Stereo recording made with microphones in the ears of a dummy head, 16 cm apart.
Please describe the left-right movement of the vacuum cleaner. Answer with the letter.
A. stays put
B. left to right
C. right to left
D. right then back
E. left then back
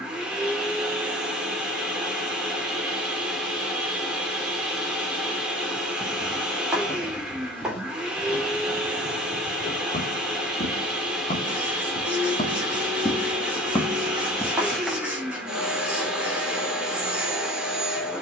A.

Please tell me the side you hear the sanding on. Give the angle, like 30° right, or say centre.
10° right.